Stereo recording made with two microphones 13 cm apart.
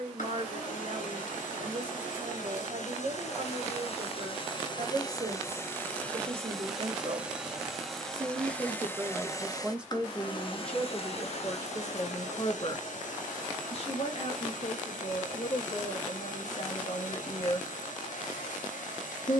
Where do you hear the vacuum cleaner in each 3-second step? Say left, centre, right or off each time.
left, left, centre, left, left, left, left.